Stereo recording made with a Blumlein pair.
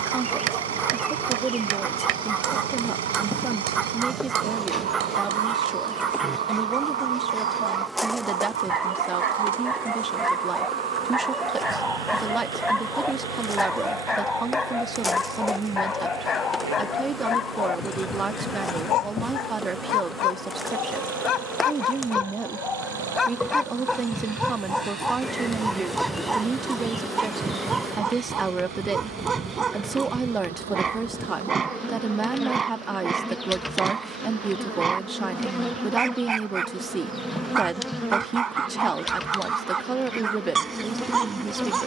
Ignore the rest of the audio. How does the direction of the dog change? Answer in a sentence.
You can hear the dog move from right to left and back again.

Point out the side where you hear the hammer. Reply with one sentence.
You can hear the hammer on the right.